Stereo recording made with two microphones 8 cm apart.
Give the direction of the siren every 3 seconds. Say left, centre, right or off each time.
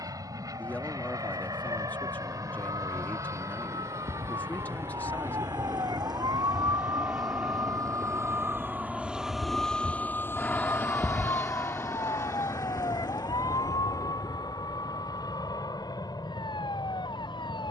right, right, right, left, left, left.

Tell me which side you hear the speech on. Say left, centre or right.
left.